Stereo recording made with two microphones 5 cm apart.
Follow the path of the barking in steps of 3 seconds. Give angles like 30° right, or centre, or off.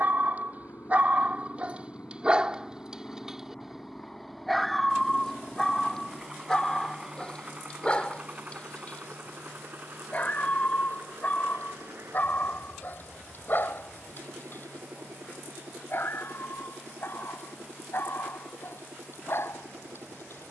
30° right, centre, 20° left, 30° left, 40° left, 50° left, 50° left.